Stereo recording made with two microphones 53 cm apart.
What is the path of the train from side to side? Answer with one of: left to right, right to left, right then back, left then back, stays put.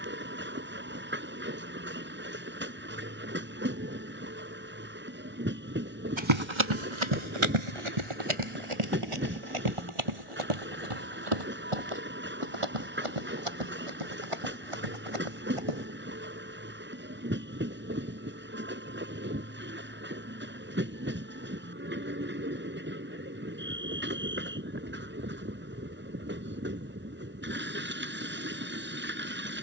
stays put.